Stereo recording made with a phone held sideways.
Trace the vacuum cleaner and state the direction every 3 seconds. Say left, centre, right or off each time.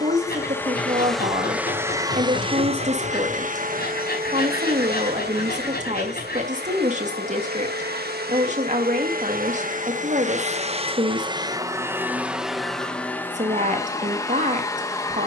centre, right, right, right, centre.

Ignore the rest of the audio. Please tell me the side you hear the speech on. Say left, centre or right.
right.